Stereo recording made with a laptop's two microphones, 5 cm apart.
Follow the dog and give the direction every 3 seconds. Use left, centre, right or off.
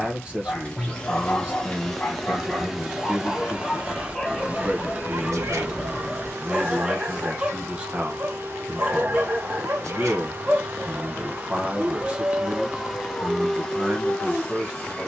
left, centre, right, right, centre.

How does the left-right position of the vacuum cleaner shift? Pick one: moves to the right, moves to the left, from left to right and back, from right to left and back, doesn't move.
from left to right and back.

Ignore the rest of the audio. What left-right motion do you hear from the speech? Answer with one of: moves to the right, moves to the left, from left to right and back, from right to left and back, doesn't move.
doesn't move.